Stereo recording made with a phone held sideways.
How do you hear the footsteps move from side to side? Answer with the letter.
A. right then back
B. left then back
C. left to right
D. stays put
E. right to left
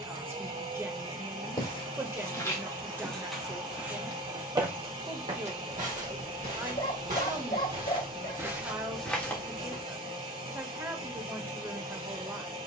A.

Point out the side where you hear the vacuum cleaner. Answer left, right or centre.
right.